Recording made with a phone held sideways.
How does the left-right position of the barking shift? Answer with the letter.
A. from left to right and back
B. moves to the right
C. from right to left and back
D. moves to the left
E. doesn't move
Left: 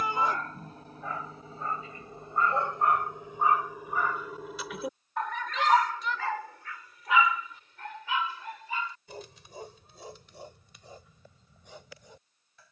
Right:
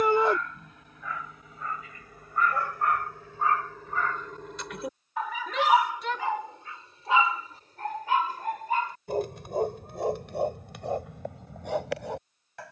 B.